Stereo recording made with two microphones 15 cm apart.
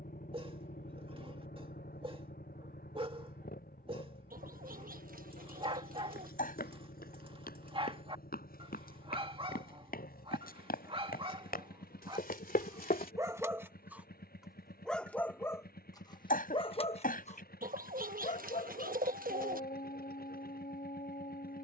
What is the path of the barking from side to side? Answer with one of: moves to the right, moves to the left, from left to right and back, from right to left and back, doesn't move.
moves to the left.